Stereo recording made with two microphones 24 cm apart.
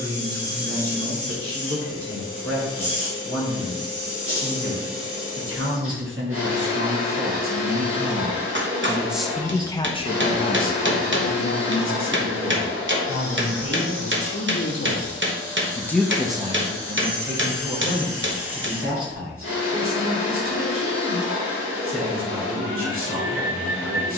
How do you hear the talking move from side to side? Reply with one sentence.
You can hear the talking go left and come back.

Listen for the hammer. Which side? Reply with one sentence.
In this clip you hear the hammer on the right.